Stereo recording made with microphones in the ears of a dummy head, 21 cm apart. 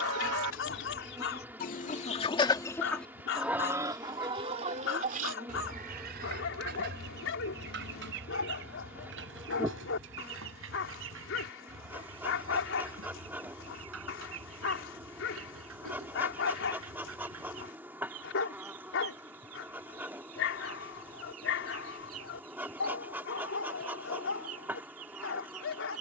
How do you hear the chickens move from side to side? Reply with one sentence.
In this clip you hear the chickens go from the left side to the right.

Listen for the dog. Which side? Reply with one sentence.
In this clip you hear the dog on the left.